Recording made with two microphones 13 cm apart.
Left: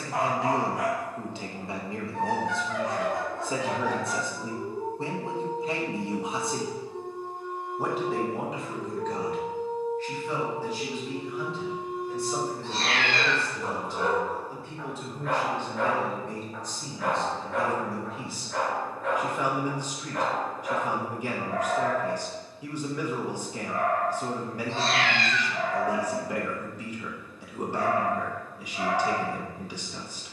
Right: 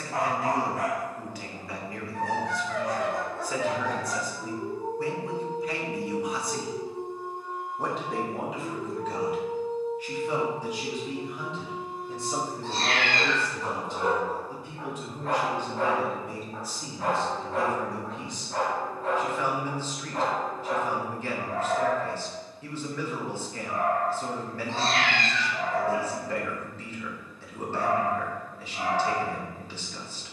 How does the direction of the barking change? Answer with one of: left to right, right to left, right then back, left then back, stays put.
left to right.